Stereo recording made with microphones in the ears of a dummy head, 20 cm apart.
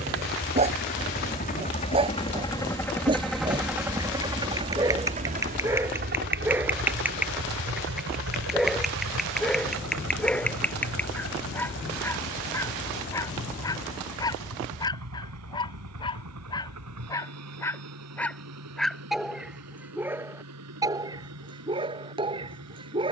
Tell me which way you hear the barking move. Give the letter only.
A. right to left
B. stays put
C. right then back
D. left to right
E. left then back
E.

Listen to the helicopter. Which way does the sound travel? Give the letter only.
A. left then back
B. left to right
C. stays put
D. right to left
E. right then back
B.